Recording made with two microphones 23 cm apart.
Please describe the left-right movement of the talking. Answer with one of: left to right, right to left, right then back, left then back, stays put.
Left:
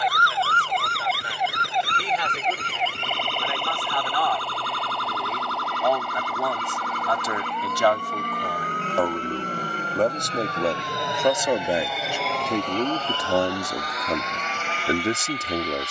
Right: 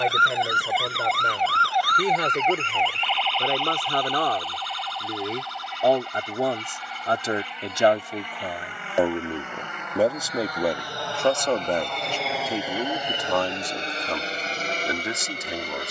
right to left.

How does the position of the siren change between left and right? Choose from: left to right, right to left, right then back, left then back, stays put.
right to left.